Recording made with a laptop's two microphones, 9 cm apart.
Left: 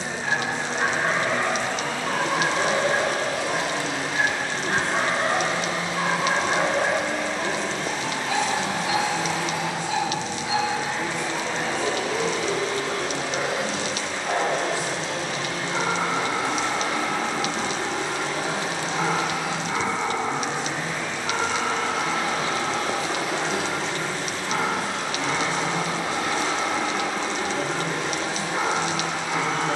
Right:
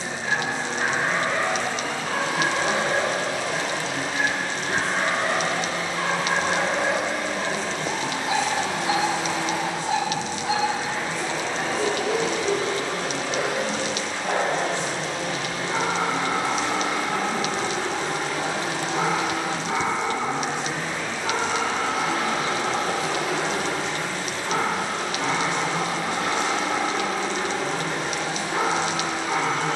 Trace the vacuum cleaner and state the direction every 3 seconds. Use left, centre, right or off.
left, left, centre, right, right, right, right, right, right, right.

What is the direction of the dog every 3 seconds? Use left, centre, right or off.
left, left, centre, right, right, right, right, right, right, right.